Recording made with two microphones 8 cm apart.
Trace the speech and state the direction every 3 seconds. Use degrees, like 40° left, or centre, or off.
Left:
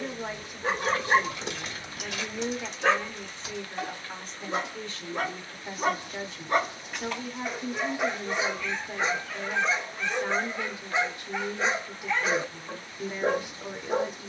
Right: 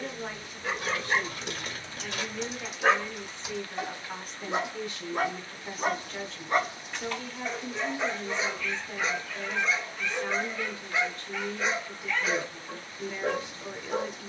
20° left, centre, 10° left, 10° left, 10° left.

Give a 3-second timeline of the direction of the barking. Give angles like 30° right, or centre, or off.
20° left, 10° right, 10° left, 30° left, 30° left.